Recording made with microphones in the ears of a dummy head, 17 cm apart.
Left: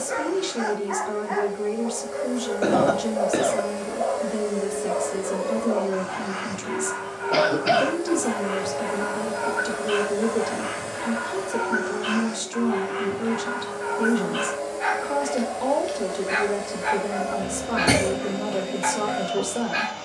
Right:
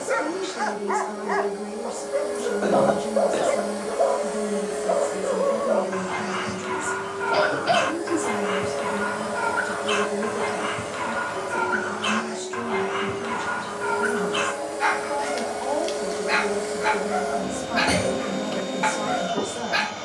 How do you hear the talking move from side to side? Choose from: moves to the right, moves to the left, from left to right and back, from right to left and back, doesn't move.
doesn't move.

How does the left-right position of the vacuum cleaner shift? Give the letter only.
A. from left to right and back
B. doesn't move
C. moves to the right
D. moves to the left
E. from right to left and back
E.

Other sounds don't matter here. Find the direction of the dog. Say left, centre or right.
right.